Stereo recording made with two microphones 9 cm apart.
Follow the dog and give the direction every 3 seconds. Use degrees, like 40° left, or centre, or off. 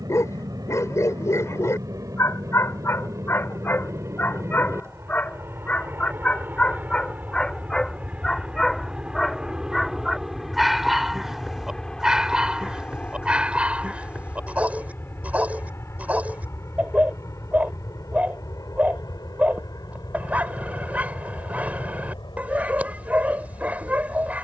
30° left, 20° left, 10° left, centre, 10° right, 20° right, 20° right, 20° right.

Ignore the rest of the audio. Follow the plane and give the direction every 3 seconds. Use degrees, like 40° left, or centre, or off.
40° right, 30° right, 20° right, centre, 20° left, 30° left, 40° left, 50° left.